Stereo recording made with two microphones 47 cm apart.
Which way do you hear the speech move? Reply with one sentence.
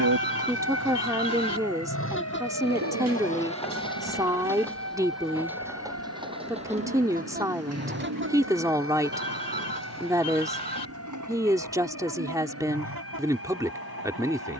You can hear the speech stay put.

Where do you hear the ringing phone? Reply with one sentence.
In this clip you hear the ringing phone on the right.